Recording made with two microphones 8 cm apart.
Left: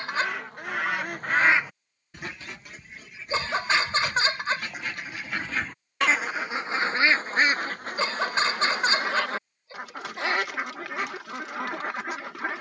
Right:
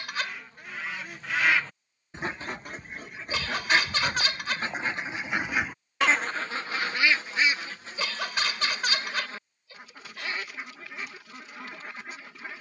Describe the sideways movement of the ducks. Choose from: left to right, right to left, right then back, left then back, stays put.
right then back.